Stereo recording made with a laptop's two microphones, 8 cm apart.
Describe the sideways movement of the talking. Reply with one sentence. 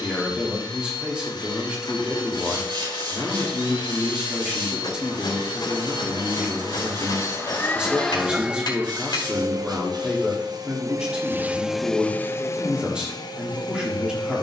In this clip you hear the talking stay put.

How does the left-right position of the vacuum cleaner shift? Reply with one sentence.
You can hear the vacuum cleaner move from left to right and back again.